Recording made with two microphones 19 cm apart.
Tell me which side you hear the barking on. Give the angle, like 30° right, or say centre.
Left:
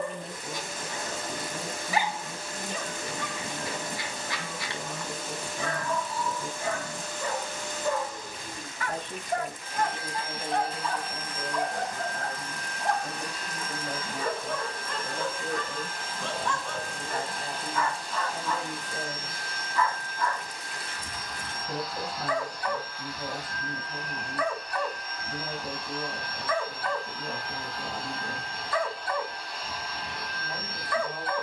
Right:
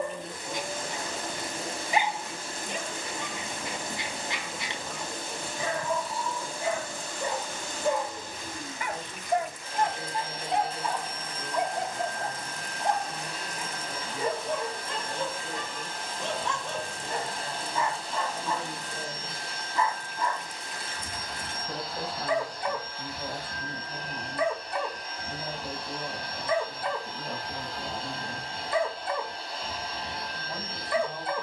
20° right.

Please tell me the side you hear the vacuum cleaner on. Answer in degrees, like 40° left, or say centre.
40° right.